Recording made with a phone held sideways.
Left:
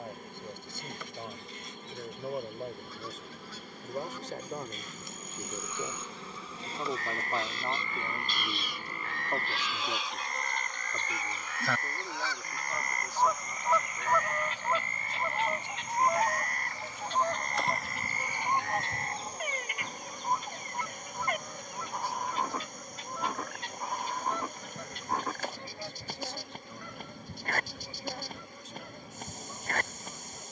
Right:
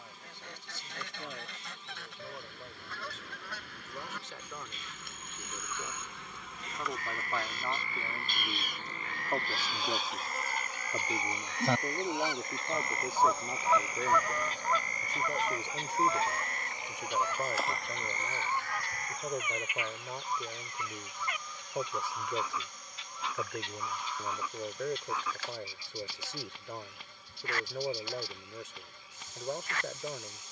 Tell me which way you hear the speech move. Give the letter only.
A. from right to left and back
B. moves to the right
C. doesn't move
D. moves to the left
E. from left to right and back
B.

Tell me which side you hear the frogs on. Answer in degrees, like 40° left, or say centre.
50° left.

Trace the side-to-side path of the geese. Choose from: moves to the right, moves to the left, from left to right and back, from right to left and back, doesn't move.
moves to the left.